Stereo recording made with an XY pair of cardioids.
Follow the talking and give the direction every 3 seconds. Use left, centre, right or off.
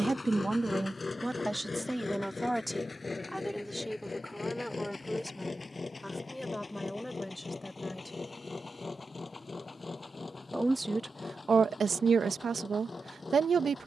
centre, centre, centre, right, right.